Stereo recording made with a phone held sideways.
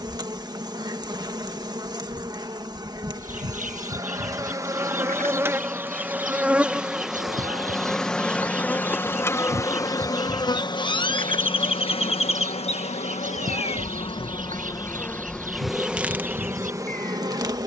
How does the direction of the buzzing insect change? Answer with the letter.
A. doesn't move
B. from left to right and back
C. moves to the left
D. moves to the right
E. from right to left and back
E.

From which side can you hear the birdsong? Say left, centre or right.
right.